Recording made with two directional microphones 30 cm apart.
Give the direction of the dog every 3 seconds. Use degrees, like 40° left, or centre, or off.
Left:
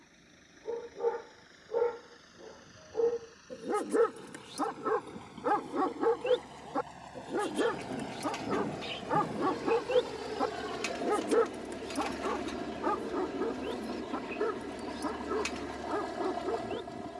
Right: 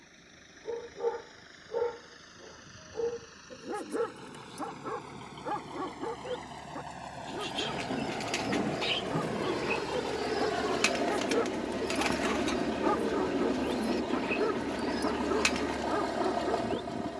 centre, 30° left, 60° left, 40° left, 10° right, 10° right.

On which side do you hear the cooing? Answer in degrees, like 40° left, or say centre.
60° right.